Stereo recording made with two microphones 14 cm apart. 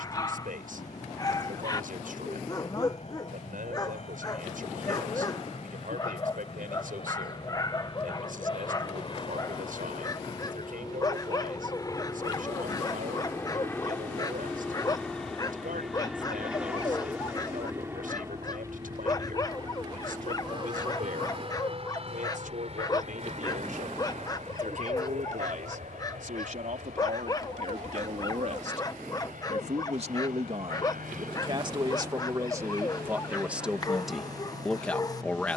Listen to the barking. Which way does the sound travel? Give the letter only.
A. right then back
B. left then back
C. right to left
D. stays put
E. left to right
D.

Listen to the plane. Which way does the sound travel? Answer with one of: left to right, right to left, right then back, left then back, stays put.
left to right.